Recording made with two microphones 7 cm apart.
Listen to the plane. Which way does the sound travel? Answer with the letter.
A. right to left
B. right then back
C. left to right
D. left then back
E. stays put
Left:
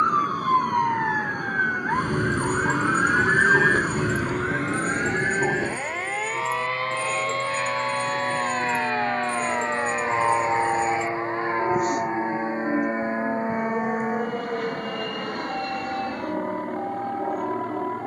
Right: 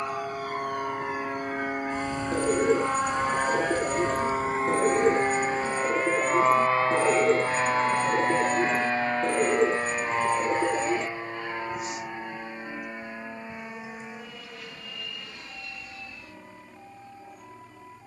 A.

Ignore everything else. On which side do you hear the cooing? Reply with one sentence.
In this clip you hear the cooing on the right.